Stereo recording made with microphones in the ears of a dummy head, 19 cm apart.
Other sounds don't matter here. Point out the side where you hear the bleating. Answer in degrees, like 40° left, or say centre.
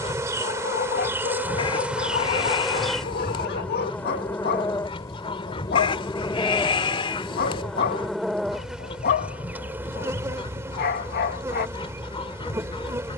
20° left.